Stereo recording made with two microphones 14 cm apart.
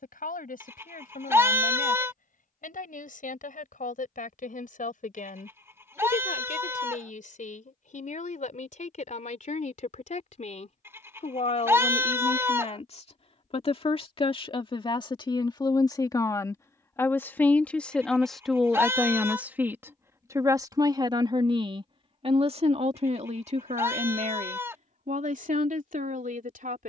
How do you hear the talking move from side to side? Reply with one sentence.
In this clip you hear the talking move from left to right.